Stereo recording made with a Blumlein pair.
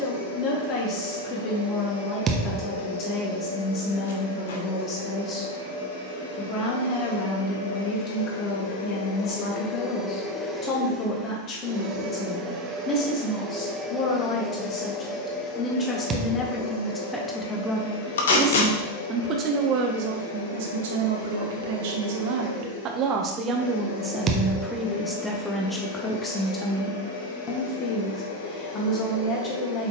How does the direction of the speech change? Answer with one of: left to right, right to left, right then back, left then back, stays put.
right then back.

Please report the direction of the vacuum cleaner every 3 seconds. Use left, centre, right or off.
left, left, left, centre, centre, left, left, left, left, left.